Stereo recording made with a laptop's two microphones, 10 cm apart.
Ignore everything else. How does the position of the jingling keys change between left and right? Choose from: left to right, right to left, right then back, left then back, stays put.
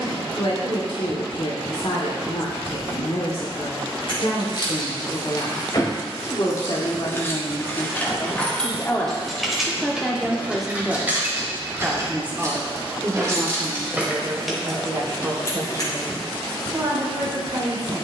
right then back.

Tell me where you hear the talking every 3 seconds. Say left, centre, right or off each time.
left, left, left, centre, right, right.